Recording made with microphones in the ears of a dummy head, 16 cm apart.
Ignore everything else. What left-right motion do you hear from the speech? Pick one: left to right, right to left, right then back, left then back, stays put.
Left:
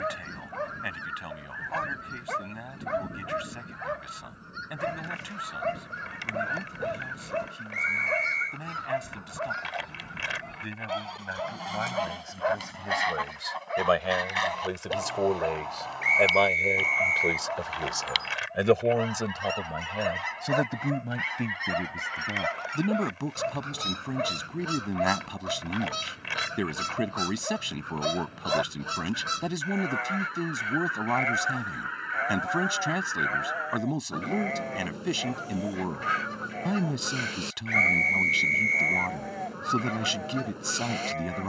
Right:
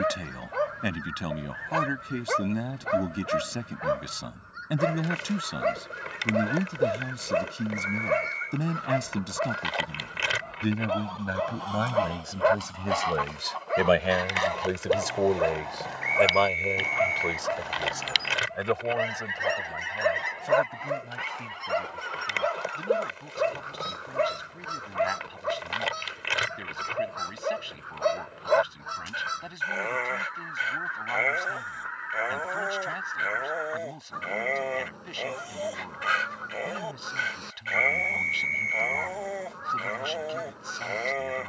right to left.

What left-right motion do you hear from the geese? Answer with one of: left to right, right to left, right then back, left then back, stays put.
right then back.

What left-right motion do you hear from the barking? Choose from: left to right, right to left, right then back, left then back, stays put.
stays put.